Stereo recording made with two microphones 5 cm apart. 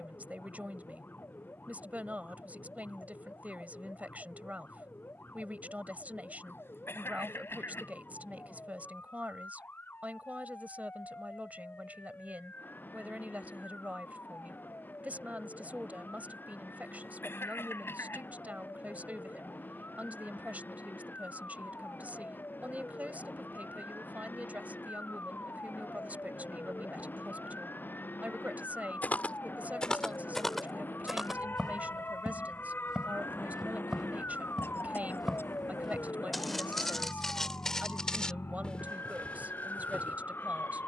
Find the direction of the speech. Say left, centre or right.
right.